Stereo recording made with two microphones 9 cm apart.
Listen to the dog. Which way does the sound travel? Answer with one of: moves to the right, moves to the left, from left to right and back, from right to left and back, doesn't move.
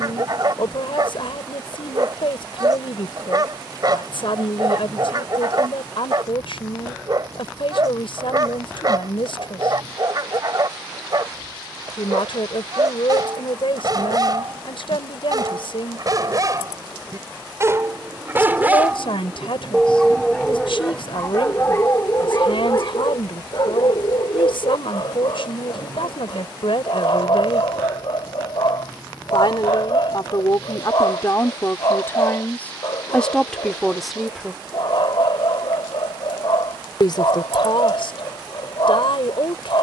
moves to the left.